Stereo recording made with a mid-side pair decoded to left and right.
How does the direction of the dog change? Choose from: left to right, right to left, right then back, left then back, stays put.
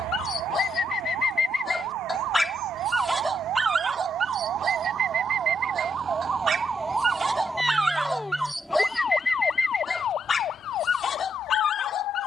right then back.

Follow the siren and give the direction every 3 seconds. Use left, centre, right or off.
right, right, centre, left.